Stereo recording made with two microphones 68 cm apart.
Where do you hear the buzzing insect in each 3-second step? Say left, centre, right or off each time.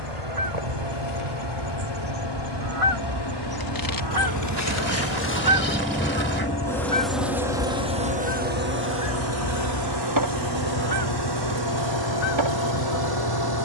left, left, centre, right, right.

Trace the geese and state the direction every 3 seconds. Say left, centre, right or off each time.
right, right, left, left, left.